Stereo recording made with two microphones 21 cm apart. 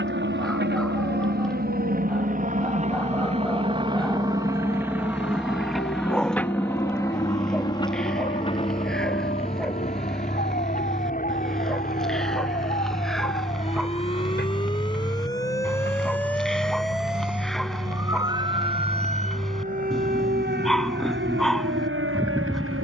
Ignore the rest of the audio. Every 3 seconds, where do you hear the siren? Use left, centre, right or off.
left, left, left, left, left, centre, right, right.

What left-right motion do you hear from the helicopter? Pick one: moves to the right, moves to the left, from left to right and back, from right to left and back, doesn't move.
moves to the left.